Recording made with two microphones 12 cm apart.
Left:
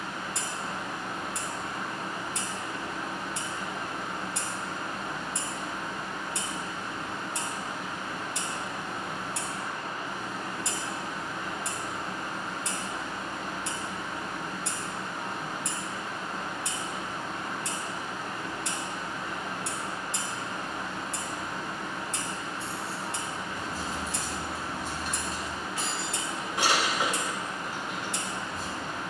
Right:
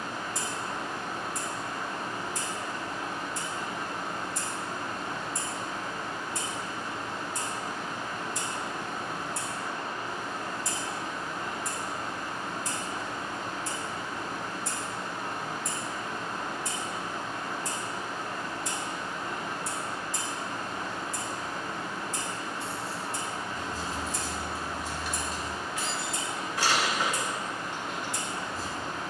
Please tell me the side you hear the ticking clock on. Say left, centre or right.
left.